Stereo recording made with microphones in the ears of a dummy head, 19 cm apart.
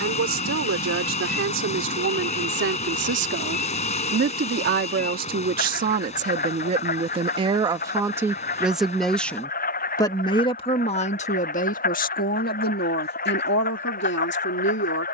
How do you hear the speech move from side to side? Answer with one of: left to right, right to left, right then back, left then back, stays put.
right to left.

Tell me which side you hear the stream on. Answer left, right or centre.
left.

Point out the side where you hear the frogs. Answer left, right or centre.
left.